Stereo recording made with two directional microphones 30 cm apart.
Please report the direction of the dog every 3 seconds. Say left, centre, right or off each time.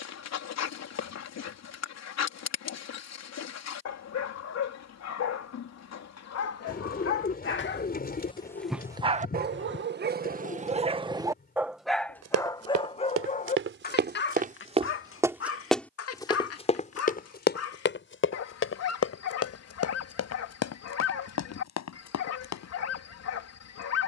left, left, left, right, left, left, left, left.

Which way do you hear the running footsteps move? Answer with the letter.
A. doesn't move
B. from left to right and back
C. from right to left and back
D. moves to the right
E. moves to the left
E.